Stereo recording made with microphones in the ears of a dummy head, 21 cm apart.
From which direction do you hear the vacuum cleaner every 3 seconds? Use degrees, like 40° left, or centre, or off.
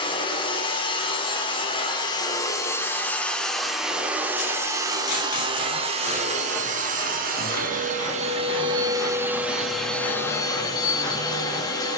20° left, 10° right, 30° right, 10° left.